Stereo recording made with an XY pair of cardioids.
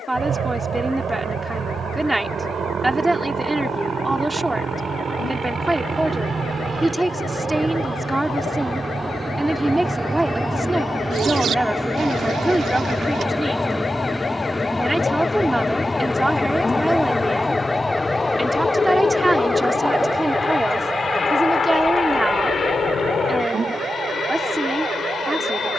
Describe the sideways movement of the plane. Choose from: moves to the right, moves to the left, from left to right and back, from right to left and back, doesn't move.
moves to the left.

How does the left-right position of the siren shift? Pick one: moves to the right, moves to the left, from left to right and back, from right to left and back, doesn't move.
moves to the right.